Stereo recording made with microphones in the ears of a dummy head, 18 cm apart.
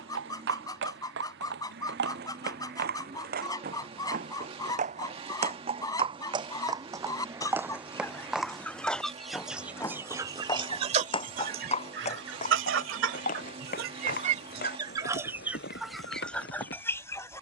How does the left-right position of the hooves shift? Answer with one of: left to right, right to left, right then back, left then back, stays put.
right to left.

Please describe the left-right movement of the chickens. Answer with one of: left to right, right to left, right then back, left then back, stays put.
right then back.